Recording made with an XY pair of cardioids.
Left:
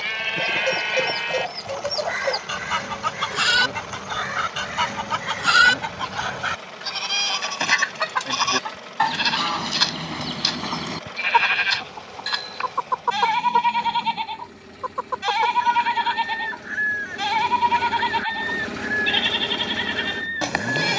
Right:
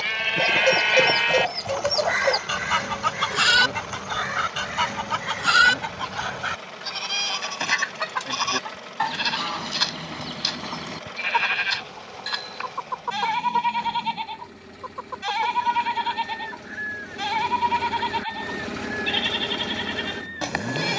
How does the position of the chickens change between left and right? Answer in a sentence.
In this clip you hear the chickens move to the left.